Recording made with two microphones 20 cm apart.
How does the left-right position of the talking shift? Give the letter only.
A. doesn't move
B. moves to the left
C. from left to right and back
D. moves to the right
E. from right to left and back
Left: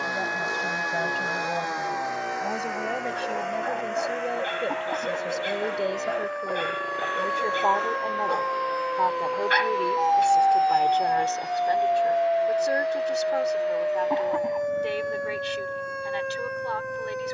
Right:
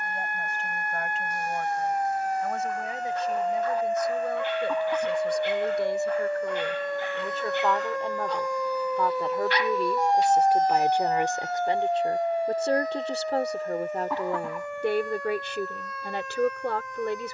D.